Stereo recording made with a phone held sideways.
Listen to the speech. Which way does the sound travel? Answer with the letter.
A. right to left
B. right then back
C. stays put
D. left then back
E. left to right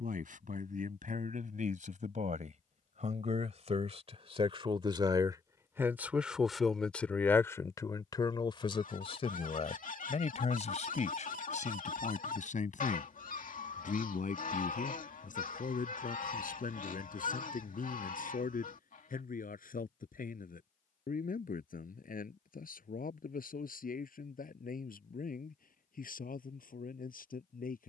A.